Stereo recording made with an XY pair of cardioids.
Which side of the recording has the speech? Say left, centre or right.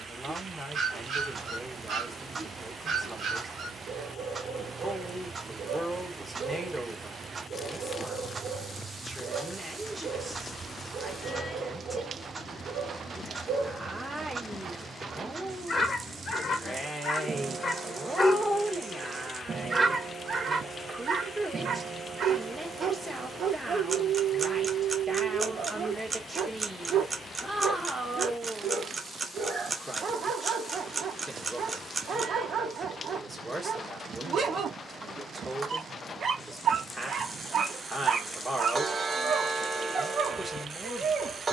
centre.